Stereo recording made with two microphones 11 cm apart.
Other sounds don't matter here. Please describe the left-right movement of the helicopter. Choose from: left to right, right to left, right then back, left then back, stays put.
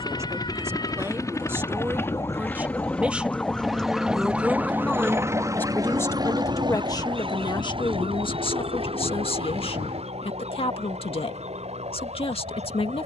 left to right.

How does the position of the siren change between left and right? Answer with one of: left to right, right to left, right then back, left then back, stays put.
left to right.